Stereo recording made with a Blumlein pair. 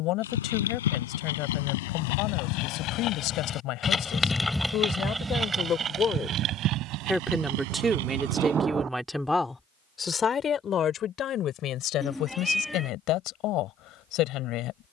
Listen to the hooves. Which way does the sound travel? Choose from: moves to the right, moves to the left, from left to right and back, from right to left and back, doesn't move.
moves to the right.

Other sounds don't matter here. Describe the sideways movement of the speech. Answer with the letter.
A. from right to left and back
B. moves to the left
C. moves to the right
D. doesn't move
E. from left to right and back
E.